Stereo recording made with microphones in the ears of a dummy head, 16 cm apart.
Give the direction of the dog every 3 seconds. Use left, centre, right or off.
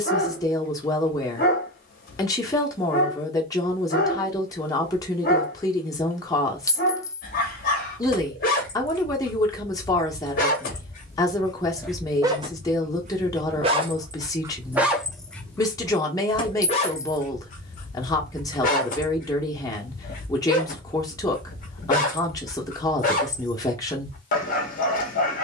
left, left, left, left, right, left, left, left, left.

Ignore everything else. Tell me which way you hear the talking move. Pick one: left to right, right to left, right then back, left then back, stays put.
stays put.